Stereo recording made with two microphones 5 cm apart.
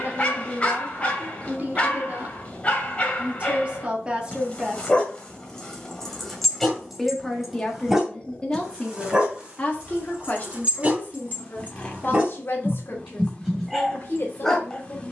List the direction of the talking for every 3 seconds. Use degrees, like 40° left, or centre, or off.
40° right, 20° right, 10° left, 40° left, 50° left.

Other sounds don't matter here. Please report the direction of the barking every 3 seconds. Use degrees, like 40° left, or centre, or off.
20° left, 20° left, centre, 30° right, 10° right.